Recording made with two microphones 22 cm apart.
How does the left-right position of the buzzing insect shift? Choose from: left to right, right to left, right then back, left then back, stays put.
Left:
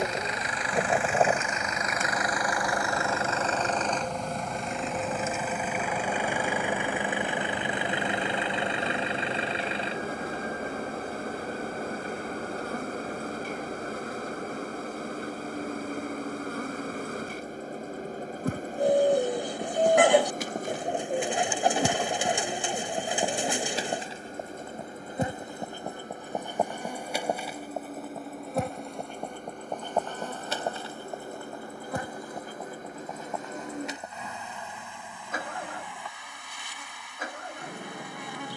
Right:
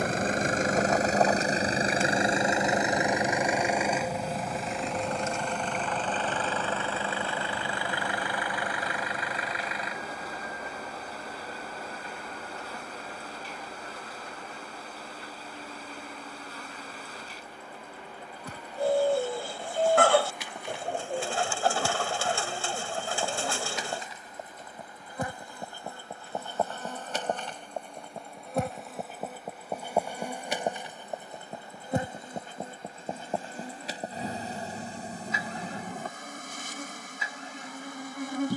left to right.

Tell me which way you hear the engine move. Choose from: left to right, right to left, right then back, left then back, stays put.
right to left.